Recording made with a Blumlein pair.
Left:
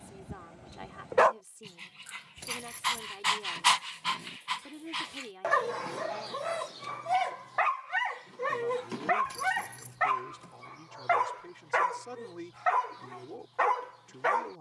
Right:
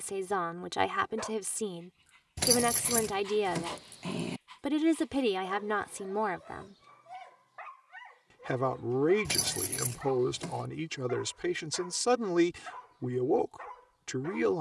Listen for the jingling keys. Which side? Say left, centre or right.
right.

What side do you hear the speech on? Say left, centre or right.
right.